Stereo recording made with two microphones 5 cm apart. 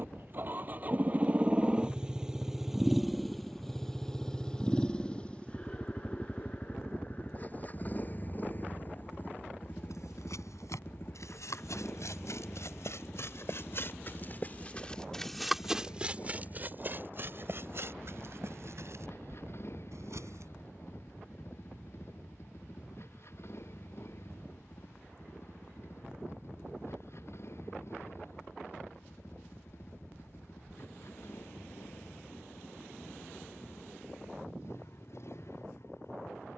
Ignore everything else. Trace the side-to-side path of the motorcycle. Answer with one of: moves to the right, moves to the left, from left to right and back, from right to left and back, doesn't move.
moves to the left.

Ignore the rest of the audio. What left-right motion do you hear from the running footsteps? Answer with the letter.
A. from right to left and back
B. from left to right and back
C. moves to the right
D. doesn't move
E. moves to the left
C.